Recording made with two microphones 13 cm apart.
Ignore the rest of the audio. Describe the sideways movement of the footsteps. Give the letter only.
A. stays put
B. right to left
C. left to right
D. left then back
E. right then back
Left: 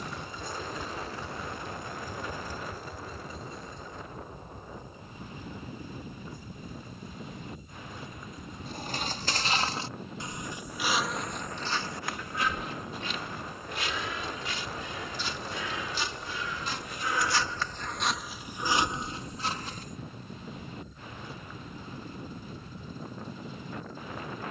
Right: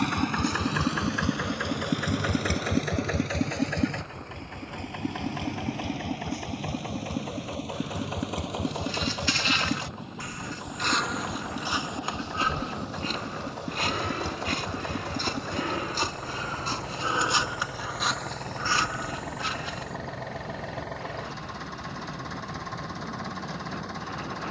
E.